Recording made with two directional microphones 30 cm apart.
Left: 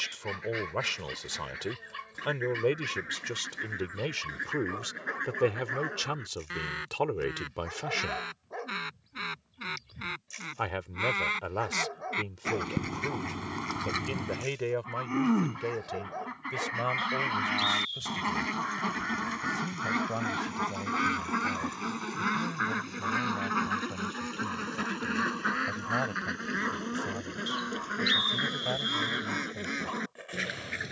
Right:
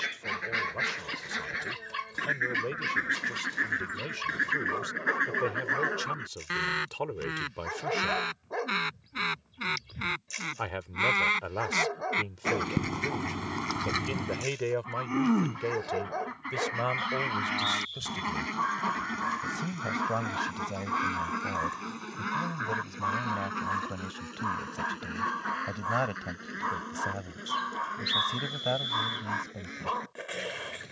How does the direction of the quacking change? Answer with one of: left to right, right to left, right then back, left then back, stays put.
right to left.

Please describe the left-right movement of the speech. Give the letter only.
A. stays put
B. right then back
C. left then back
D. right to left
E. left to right
E.